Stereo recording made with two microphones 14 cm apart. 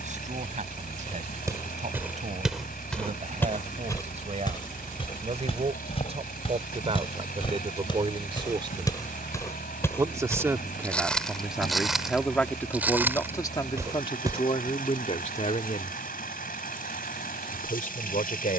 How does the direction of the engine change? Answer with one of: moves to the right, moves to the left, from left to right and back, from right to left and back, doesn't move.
doesn't move.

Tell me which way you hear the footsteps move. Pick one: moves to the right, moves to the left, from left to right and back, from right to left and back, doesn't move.
from right to left and back.